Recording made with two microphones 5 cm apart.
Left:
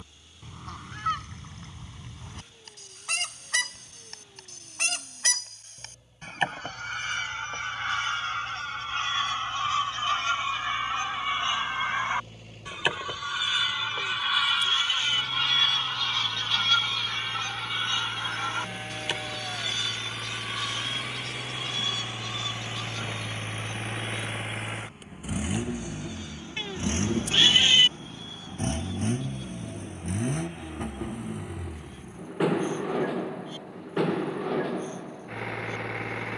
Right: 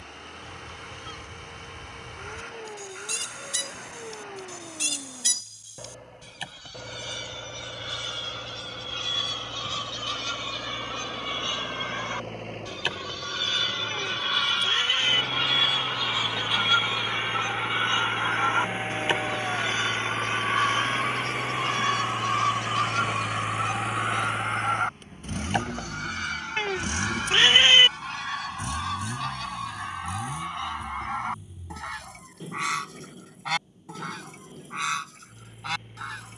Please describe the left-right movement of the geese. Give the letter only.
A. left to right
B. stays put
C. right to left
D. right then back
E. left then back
A.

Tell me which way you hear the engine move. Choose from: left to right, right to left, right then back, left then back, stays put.
right to left.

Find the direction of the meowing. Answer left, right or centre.
right.